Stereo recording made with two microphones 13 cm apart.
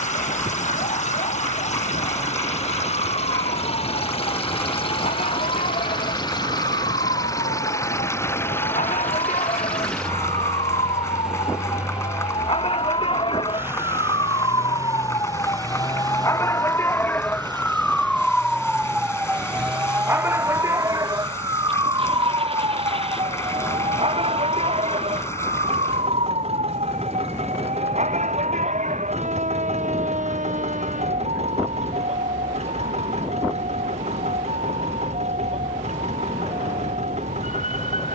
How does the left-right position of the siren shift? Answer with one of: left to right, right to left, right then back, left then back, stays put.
left to right.